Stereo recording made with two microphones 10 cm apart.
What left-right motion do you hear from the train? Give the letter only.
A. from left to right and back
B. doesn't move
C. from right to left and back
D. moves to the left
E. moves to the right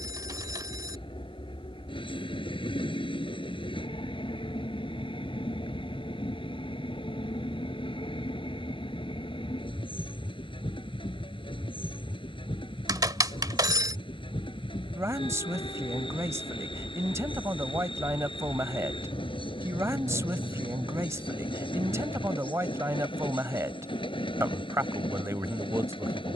B.